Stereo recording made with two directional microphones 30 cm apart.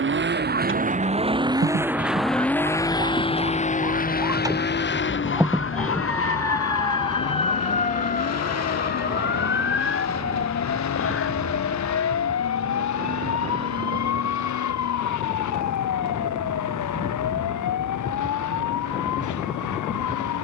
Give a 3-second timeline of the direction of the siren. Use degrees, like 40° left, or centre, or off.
40° right, 10° right, 20° left, 40° left, 50° left, 60° left, 70° left.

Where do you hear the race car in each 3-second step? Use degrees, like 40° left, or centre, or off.
10° right, 30° left, 50° left, 60° left, 60° left, 60° left, 70° left.